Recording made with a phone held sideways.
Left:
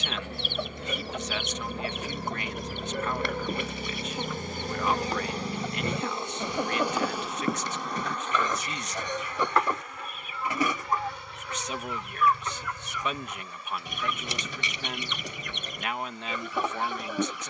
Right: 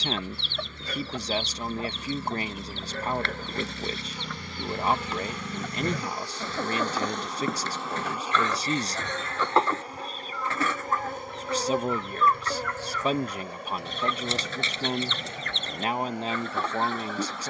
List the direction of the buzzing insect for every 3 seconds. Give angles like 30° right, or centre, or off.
60° left, 40° left, centre, 40° right, 60° right, 70° right.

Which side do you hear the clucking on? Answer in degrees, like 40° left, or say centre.
10° left.